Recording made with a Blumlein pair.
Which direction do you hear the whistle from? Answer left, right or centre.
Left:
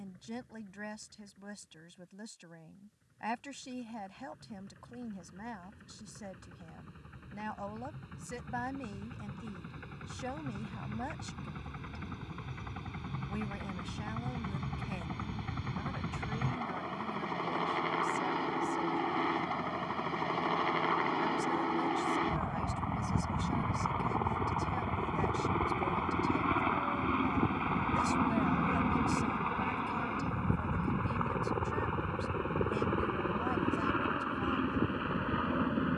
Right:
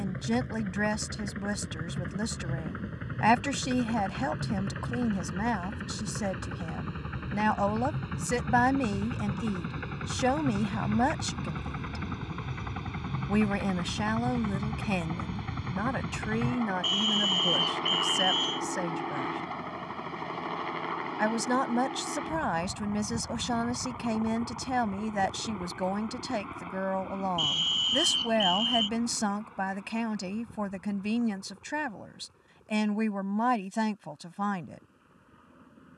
right.